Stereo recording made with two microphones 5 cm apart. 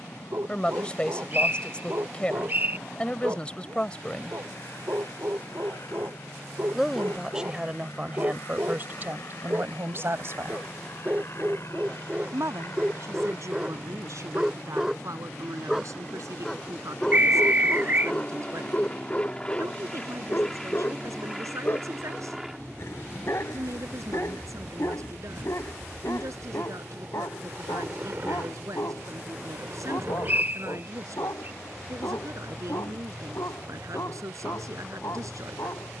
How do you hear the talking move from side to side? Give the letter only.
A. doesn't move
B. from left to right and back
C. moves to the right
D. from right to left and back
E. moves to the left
C.